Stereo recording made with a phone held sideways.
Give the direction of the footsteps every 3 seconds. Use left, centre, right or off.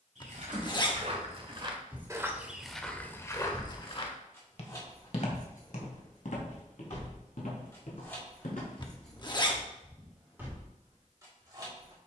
right, left, left, off.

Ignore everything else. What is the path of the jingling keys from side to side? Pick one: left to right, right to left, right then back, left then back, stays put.
left then back.